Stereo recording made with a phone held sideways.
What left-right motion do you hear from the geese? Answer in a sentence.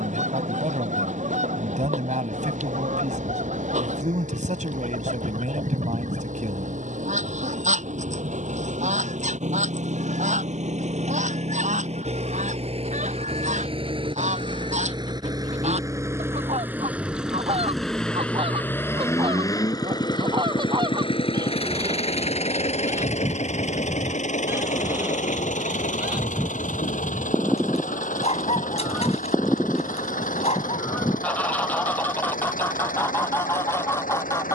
You can hear the geese move from right to left.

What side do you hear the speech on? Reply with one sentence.
In this clip you hear the speech on the right.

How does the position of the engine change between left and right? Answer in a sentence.
In this clip you hear the engine move to the left.